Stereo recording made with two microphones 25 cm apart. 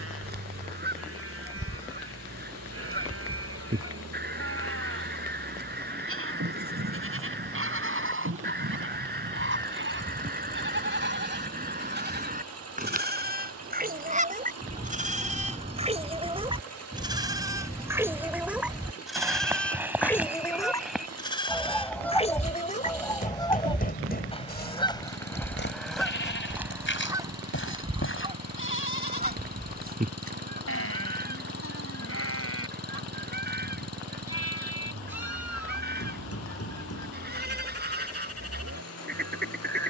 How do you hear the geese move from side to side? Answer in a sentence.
You can hear the geese go left and come back.